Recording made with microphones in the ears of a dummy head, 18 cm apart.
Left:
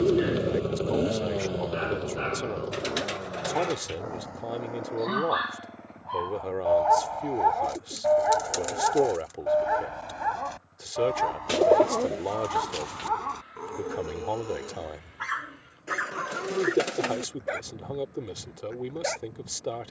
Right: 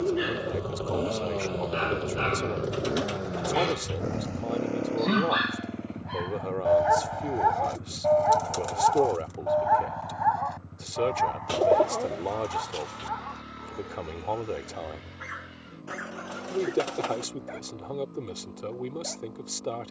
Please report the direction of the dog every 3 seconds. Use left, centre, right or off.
right, right, centre, left, left, left, left.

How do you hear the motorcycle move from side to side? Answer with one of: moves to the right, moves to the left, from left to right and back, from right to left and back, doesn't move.
moves to the right.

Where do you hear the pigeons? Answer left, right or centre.
left.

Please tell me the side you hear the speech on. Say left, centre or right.
centre.